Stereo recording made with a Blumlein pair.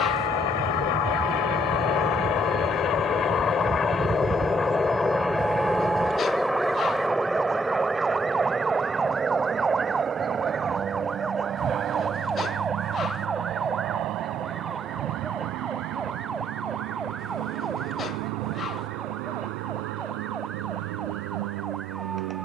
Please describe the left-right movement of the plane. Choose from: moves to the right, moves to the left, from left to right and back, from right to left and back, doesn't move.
moves to the right.